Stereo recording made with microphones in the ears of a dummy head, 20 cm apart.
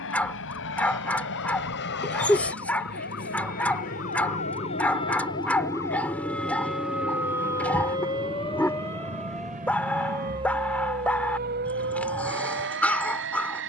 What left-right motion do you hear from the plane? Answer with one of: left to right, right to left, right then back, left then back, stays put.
left to right.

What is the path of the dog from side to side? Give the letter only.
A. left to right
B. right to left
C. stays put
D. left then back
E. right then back
C.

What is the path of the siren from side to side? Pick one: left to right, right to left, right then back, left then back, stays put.
left to right.